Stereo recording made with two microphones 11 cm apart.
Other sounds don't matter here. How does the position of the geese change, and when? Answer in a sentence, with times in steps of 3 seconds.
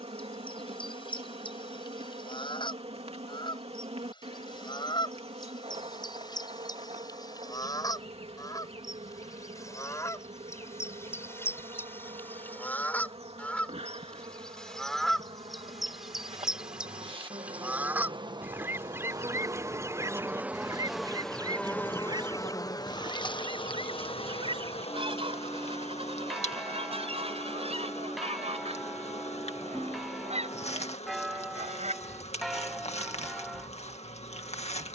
You can hear the geese on the left from 0 s, in the centre from 12 s and on the right from 18 s.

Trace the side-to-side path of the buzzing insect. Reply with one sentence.
In this clip you hear the buzzing insect go from the right side to the left.